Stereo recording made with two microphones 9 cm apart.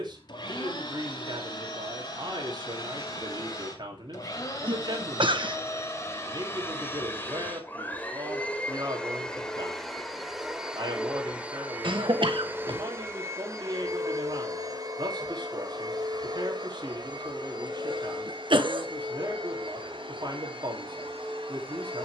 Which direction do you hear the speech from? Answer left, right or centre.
right.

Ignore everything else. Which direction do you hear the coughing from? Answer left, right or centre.
right.